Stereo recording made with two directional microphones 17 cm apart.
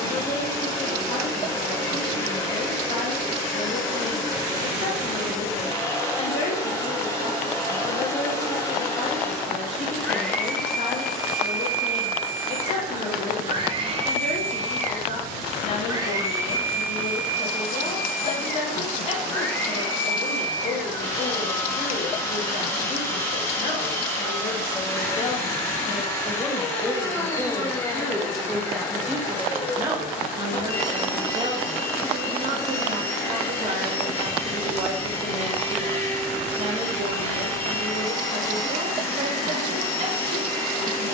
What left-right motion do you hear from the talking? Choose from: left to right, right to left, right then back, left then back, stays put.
left to right.